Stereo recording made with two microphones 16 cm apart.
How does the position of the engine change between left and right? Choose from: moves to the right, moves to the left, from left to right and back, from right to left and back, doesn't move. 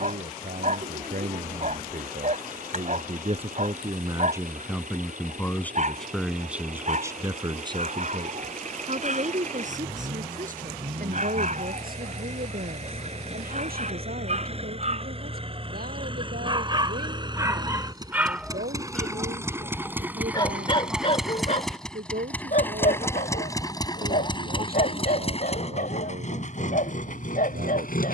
moves to the left.